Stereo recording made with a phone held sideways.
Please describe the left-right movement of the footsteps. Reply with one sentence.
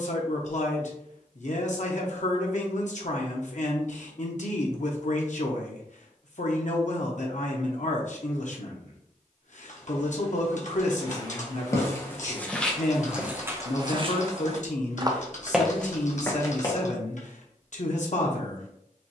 In this clip you hear the footsteps move from left to right and back again.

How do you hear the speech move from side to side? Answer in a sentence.
In this clip you hear the speech stay in one place.